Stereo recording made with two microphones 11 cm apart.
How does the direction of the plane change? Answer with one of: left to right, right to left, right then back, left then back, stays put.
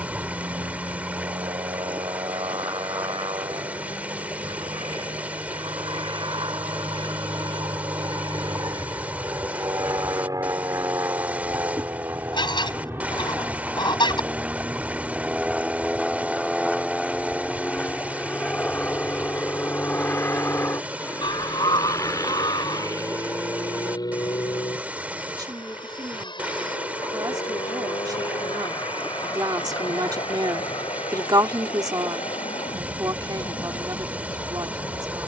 right to left.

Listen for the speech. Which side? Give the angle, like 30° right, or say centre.
40° right.